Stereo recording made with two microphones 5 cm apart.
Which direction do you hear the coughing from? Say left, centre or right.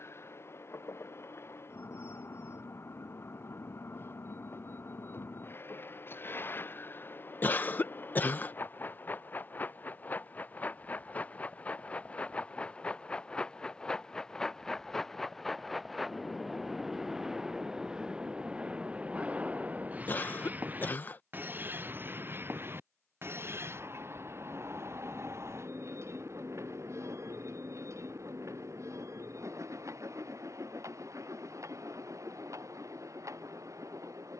left.